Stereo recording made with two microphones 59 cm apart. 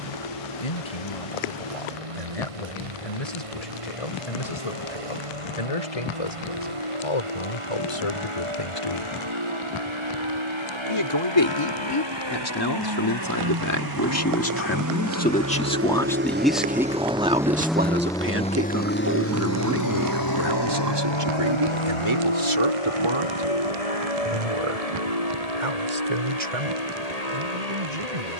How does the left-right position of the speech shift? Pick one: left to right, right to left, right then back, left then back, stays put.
left to right.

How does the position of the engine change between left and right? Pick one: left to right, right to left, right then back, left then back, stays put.
right to left.